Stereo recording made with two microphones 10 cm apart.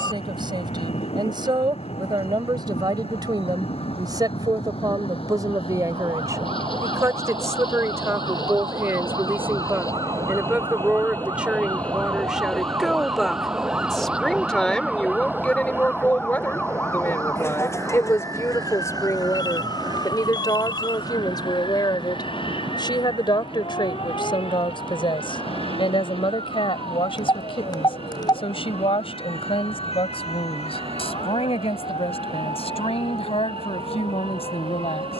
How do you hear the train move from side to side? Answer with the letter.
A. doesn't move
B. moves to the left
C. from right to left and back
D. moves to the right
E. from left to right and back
D.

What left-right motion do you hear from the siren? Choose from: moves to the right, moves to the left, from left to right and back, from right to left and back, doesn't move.
moves to the left.